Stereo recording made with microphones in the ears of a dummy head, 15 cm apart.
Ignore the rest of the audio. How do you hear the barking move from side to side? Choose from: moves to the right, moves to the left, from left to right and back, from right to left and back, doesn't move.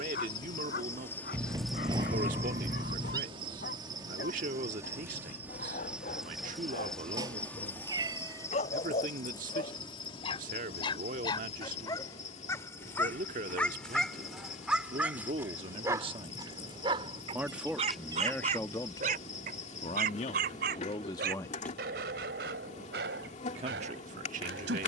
moves to the right.